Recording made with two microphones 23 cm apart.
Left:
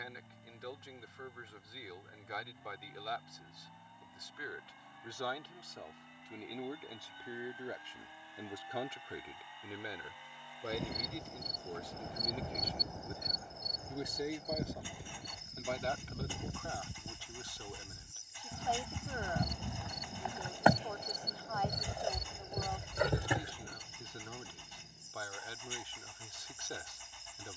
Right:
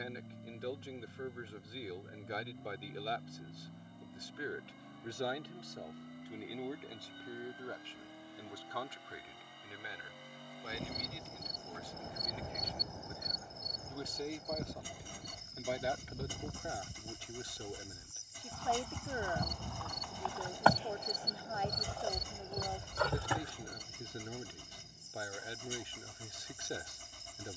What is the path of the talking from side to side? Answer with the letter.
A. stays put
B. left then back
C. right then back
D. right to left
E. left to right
B.